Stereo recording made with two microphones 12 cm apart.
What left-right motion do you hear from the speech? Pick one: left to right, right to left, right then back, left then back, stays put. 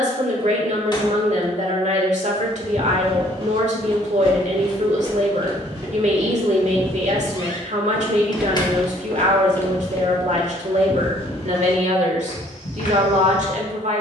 stays put.